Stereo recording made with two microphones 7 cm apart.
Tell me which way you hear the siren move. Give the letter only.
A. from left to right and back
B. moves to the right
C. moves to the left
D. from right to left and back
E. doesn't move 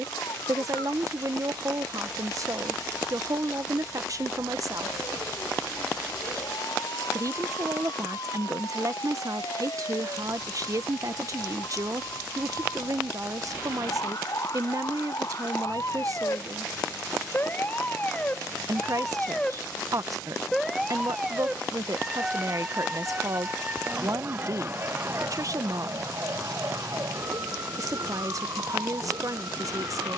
B.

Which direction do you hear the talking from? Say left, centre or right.
right.